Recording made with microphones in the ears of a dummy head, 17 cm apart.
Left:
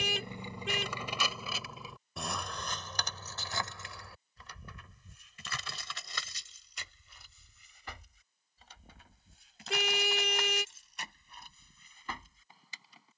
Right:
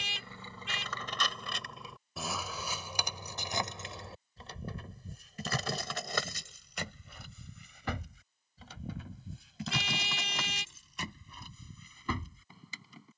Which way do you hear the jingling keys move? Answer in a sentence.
You can hear the jingling keys go from the left side to the right.